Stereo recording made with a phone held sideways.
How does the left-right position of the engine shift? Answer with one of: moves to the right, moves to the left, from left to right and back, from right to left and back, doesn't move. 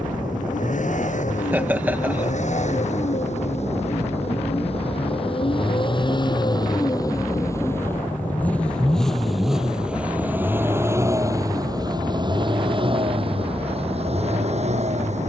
moves to the right.